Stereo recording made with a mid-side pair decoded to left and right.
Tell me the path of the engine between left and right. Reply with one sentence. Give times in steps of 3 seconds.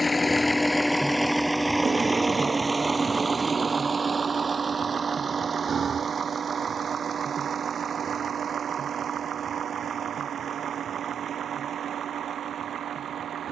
In this clip you hear the engine in the centre from 0 s and on the right from 3 s.